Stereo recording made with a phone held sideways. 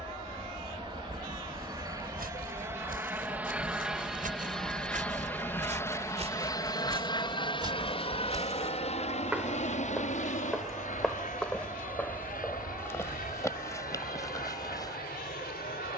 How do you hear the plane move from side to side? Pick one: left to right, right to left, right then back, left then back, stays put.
right to left.